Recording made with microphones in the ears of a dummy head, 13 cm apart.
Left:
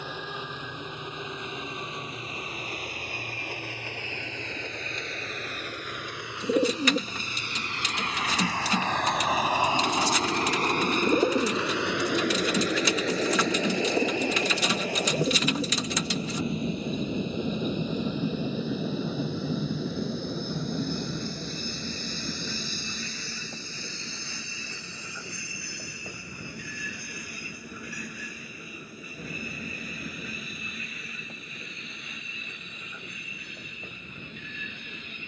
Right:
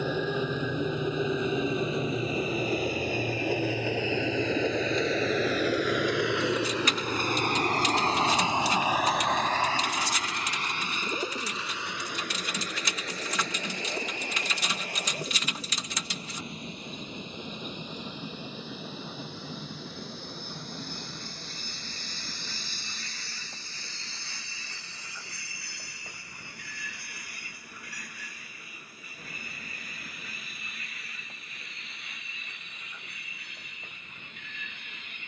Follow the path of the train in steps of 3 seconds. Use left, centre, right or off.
right, right, right, left, left, left, left, left, left, left, left, left.